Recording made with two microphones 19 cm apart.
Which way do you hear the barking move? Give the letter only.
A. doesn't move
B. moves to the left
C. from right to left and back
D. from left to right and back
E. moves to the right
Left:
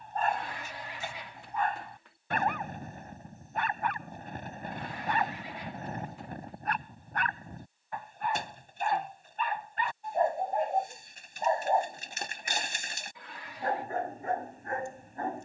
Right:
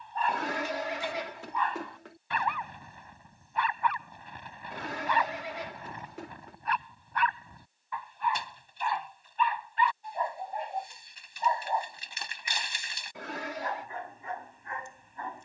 A.